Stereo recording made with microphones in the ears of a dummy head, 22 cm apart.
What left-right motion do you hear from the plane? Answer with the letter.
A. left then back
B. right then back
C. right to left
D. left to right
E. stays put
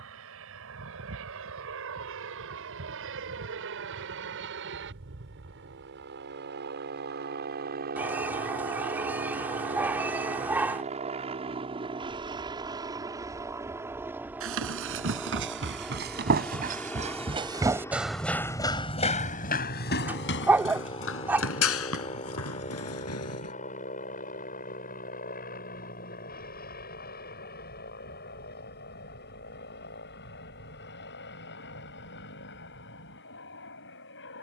C.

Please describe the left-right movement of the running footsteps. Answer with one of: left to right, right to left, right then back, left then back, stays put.
right to left.